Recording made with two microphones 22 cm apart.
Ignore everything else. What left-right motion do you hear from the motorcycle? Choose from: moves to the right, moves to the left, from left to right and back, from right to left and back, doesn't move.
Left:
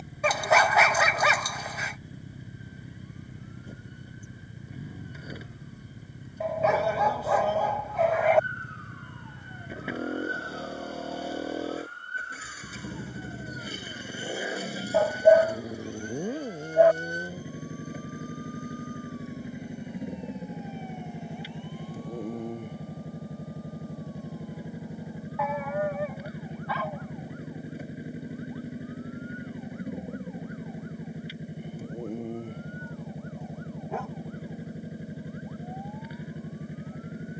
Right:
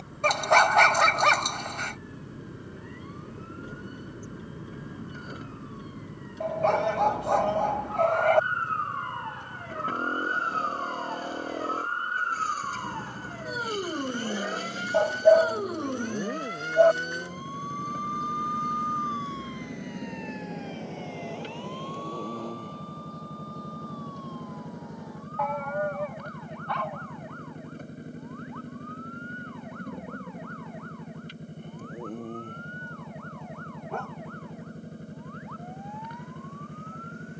doesn't move.